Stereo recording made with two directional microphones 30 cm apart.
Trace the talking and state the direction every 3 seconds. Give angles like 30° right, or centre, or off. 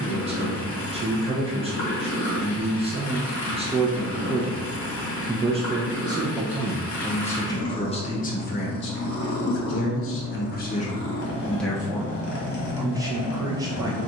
20° right, 20° right, 10° left, 30° left, 10° right.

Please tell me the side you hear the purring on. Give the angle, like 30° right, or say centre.
40° left.